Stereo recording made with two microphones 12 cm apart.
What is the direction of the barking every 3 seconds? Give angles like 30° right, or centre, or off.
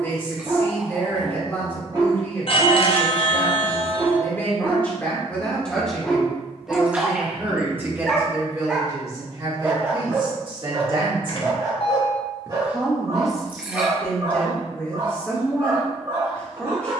40° right, 20° right, centre, 30° right, 30° right, 30° right.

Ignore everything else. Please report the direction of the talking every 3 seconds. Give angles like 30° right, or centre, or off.
20° left, 10° left, 10° right, 40° right, centre, 10° left.